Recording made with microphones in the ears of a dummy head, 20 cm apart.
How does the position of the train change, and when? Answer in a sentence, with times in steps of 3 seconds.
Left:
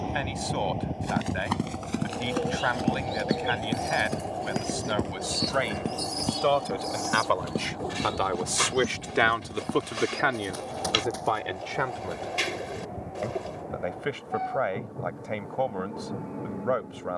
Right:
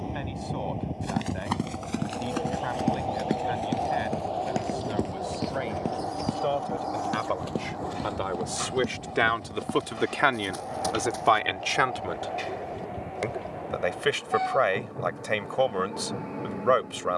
You can hear the train in the centre from 0 s and on the right from 3 s.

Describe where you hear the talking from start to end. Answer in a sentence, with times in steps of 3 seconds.
In this clip you hear the talking on the left from 0 s and on the right from 9 s.